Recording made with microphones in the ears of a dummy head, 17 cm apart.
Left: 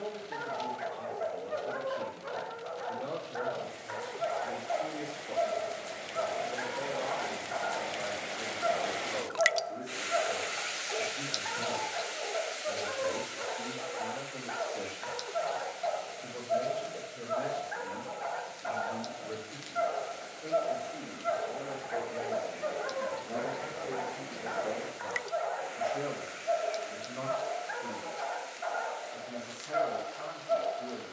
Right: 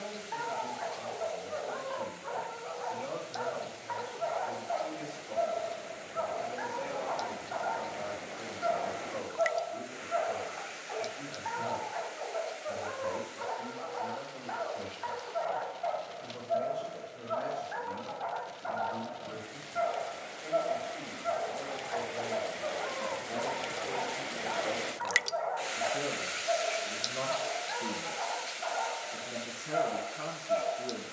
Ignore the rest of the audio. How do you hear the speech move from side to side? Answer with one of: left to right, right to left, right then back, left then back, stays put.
left to right.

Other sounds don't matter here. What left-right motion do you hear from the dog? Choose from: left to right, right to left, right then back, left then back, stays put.
stays put.